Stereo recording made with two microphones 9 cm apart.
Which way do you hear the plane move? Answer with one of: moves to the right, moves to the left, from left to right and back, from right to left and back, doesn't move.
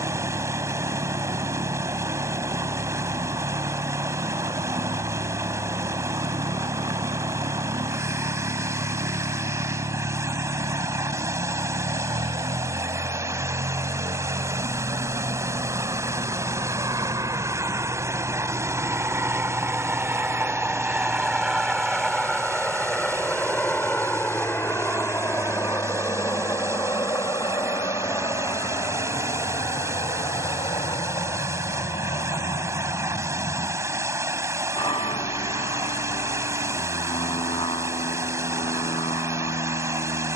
moves to the left.